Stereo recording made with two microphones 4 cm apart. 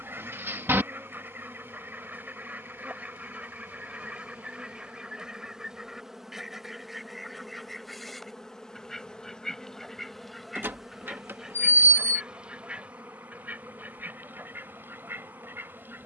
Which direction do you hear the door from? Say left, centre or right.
right.